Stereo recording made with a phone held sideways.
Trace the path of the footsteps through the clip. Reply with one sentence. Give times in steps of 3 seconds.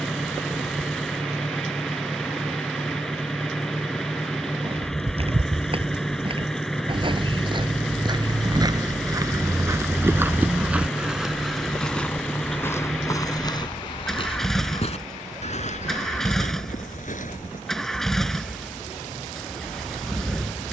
In this clip you hear the footsteps not at all from 0 s, on the right from 3 s, in the centre from 9 s, on the left from 12 s and not at all from 18 s.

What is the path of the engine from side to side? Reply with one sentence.
You can hear the engine stay in one place.